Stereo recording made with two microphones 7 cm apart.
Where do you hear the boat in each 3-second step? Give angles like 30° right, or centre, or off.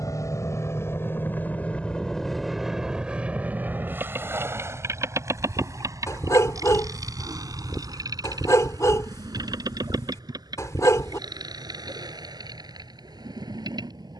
20° left, 30° right, 50° right, 60° right, 70° right.